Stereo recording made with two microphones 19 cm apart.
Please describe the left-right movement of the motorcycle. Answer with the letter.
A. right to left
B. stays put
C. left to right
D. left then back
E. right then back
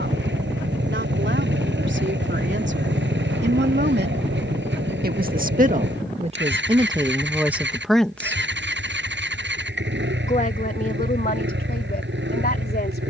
B.